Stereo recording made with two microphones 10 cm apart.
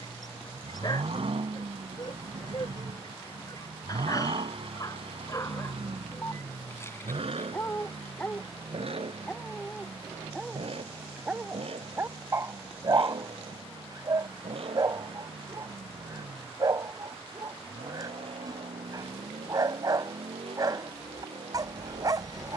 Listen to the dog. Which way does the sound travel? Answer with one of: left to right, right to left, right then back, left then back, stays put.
left to right.